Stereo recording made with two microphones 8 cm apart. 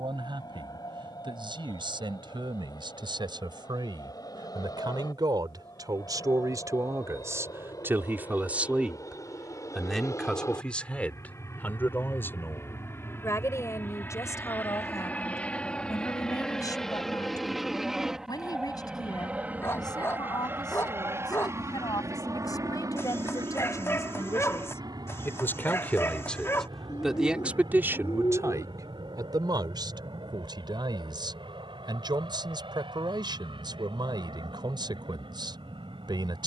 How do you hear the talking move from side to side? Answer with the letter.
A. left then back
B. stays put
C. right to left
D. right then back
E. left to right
A.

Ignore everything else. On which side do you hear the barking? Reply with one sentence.
In this clip you hear the barking on the left.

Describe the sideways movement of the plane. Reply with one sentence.
You can hear the plane travel towards the right.